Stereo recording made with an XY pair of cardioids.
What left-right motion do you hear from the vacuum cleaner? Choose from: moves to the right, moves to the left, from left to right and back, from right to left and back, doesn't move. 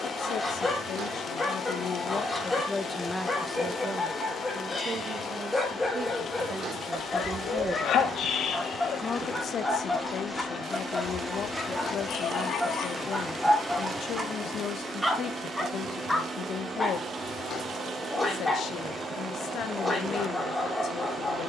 moves to the right.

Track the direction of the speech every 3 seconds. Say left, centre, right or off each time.
left, right, right, left, left, left, left.